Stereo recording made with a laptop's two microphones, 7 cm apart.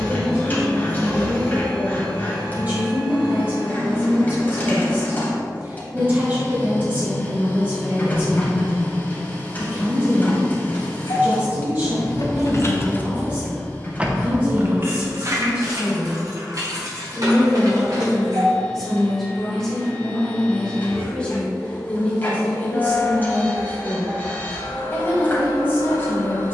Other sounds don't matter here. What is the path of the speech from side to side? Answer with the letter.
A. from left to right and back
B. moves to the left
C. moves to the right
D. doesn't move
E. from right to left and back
B.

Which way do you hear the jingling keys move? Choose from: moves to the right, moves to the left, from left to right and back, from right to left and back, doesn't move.
moves to the right.